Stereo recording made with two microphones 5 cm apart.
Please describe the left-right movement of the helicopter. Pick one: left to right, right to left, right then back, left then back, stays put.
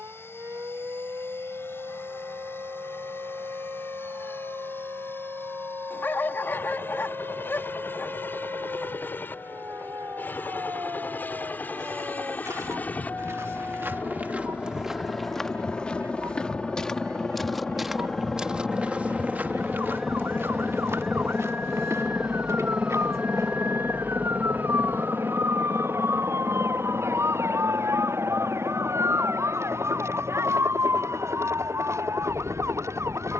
left to right.